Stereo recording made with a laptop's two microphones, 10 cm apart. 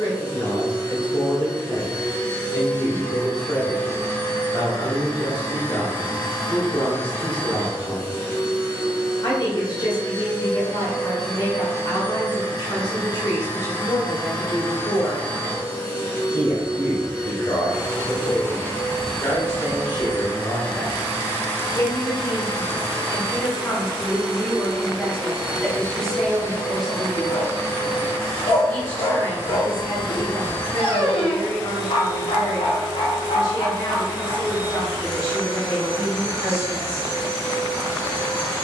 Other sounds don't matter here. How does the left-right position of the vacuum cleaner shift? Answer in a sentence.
You can hear the vacuum cleaner stay put.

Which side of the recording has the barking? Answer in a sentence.
In this clip you hear the barking on the left.